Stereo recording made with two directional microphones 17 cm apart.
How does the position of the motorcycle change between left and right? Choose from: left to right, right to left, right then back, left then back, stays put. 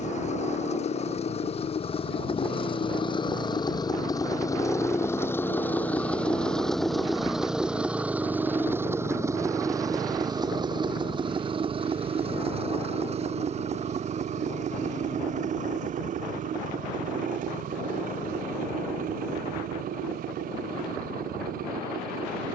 left to right.